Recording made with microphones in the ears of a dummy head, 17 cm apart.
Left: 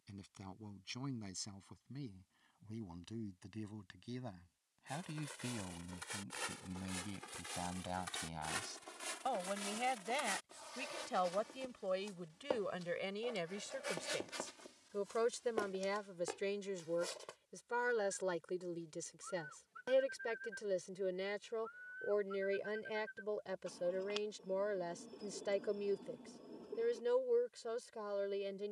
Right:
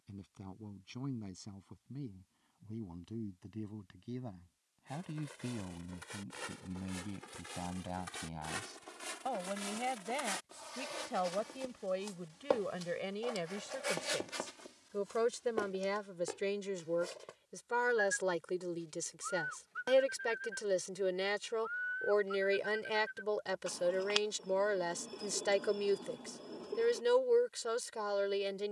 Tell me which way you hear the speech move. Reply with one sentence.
You can hear the speech go from the left side to the right.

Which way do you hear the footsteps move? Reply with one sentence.
In this clip you hear the footsteps move from left to right and back again.